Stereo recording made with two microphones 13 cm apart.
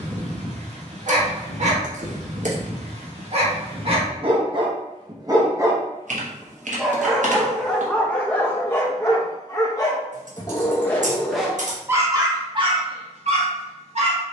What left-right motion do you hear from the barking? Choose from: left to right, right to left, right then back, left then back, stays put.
left then back.